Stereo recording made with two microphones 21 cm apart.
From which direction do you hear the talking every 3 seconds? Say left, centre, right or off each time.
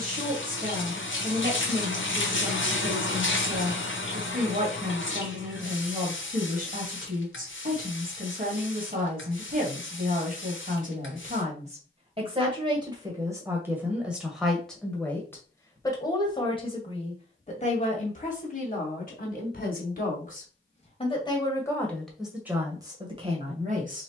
right, right, right, right, centre, left, left, centre.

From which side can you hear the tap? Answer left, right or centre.
left.